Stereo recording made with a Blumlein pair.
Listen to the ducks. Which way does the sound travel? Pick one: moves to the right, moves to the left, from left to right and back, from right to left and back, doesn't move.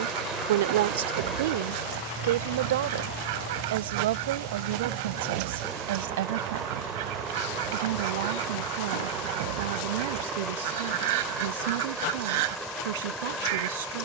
doesn't move.